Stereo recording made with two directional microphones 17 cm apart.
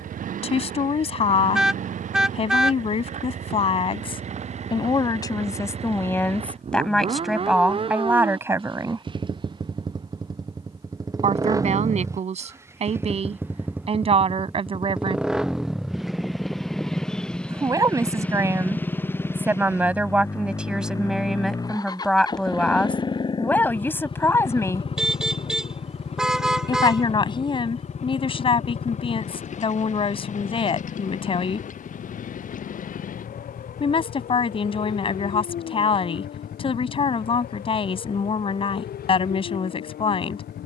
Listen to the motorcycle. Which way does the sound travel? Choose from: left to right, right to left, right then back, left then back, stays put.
right to left.